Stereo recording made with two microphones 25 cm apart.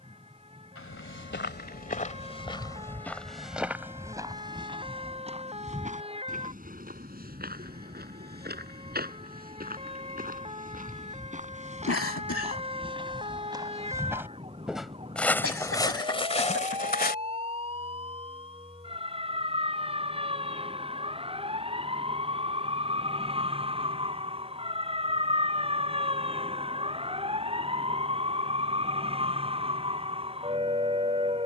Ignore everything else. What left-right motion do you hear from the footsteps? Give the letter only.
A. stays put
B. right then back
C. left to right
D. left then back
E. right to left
B.